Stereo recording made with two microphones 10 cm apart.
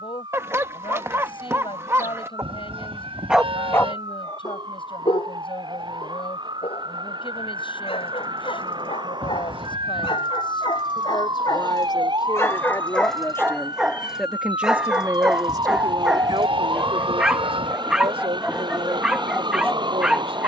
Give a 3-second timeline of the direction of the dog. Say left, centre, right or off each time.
right, left, left, left, centre, centre, centre.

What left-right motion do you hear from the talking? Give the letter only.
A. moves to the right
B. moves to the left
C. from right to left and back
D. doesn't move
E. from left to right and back
A.